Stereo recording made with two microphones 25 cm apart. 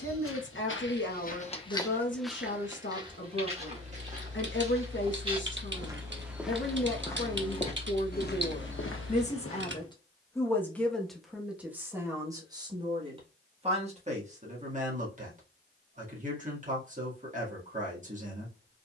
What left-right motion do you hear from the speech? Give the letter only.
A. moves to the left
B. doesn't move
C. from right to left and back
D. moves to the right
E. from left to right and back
D.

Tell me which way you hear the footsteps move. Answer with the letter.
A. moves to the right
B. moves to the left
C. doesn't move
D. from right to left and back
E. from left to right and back
E.